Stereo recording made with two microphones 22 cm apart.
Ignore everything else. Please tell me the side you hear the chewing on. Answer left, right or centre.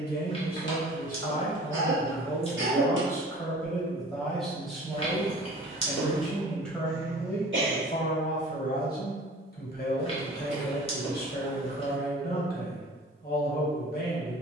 left.